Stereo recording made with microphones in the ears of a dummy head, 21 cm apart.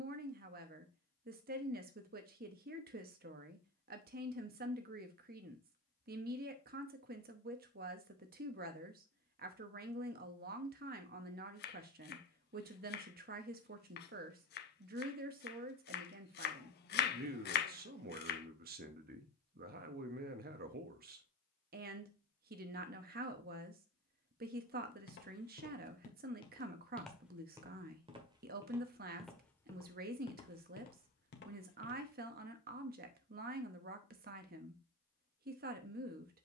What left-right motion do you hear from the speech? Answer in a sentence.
In this clip you hear the speech stay put.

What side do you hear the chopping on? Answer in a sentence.
In this clip you hear the chopping on the left.